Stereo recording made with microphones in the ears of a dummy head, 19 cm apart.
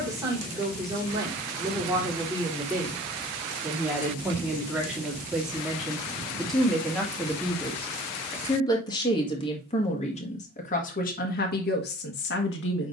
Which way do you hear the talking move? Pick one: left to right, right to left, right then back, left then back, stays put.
right to left.